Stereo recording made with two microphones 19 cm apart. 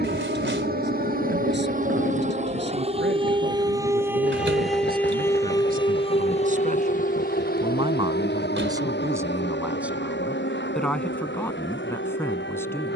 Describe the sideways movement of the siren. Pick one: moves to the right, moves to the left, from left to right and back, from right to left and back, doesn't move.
moves to the left.